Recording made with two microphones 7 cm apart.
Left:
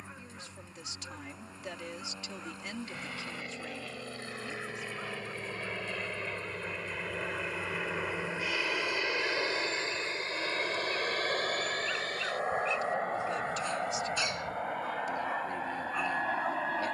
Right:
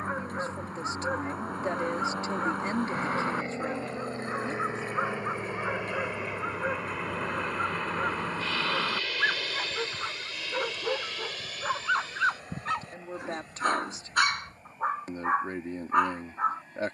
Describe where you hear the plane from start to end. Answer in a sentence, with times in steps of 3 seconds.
You can hear the plane on the right from 0 s, in the centre from 6 s and on the left from 9 s.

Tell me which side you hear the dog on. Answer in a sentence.
In this clip you hear the dog on the right.